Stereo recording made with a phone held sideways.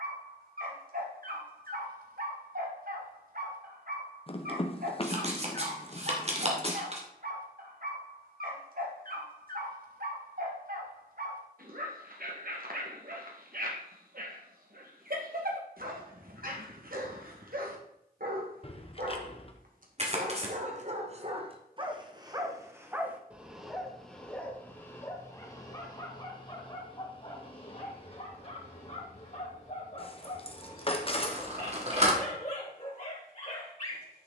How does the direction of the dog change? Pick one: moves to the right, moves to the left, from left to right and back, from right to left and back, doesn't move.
moves to the left.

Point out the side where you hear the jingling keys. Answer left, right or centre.
left.